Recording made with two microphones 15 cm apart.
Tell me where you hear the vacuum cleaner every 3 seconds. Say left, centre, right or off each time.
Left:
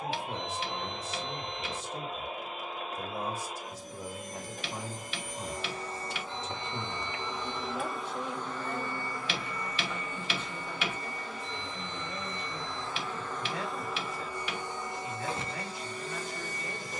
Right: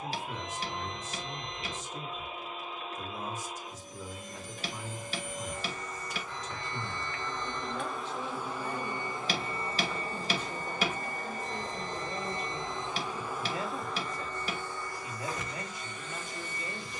left, left, centre, right, centre, left.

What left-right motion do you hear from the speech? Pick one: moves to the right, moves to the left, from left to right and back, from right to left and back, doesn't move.
moves to the right.